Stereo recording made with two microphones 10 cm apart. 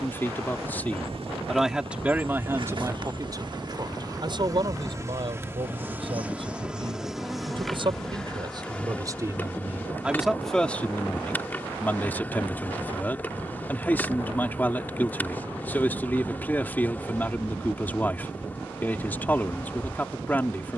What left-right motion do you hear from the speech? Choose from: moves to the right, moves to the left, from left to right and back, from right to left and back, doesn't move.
from left to right and back.